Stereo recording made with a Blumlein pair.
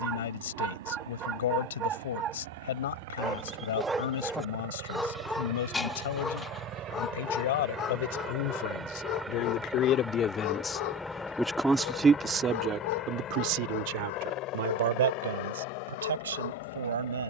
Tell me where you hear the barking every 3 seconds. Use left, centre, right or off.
right, centre, left, left, left, left.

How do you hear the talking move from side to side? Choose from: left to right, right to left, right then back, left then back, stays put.
left to right.